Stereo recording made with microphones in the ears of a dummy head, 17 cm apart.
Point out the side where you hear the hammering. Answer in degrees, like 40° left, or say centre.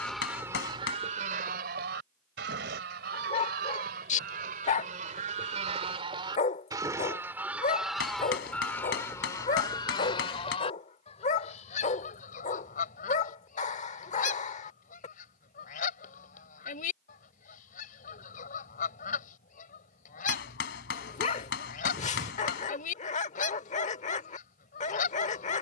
70° left.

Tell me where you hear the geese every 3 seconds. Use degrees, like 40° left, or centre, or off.
40° right, 50° right, 10° right, 30° left, 40° left, 40° left, 40° left, 40° left, 40° left.